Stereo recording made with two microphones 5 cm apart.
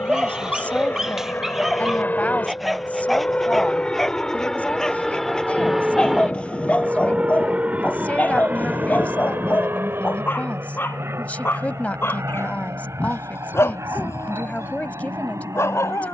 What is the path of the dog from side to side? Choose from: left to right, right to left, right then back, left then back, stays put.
right to left.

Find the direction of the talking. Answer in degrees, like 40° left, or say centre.
30° left.